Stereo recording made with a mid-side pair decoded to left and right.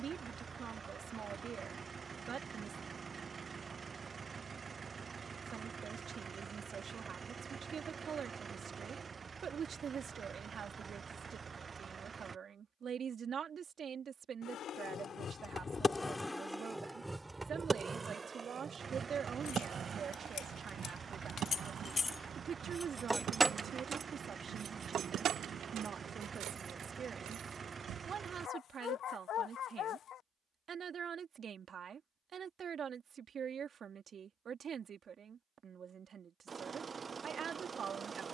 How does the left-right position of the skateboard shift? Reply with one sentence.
You can hear the skateboard go from the left side to the right.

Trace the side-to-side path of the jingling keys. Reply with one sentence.
You can hear the jingling keys go from the left side to the right.